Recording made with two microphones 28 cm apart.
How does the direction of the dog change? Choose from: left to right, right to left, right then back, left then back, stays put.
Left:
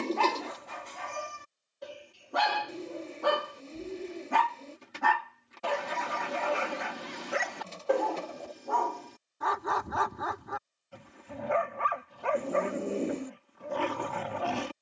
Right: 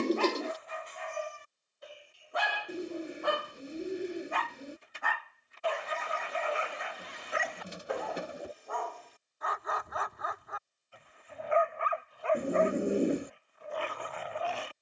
stays put.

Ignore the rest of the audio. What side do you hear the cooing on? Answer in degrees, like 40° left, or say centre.
20° right.